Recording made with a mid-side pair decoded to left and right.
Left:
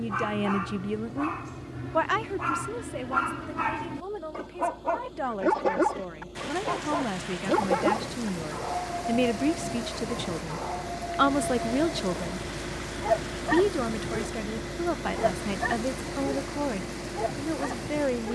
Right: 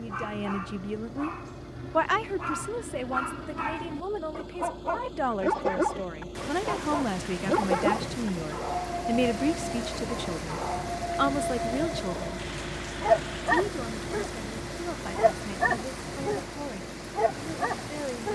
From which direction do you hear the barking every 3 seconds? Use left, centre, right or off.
left, left, centre, right, right, right.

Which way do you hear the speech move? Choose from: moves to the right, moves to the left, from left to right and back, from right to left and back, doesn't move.
from left to right and back.